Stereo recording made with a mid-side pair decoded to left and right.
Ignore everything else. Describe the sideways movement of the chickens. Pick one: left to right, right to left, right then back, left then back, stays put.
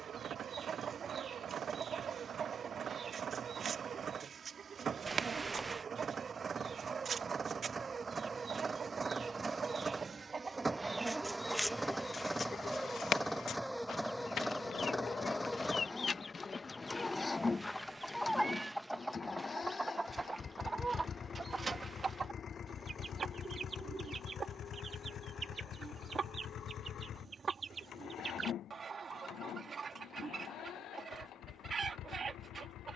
left then back.